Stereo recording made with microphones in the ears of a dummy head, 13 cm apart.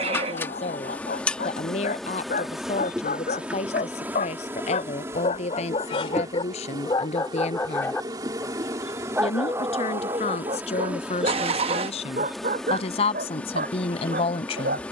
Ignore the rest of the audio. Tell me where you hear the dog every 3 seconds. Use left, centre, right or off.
left, left, left, right, right.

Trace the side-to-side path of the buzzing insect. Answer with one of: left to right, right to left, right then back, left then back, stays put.
right then back.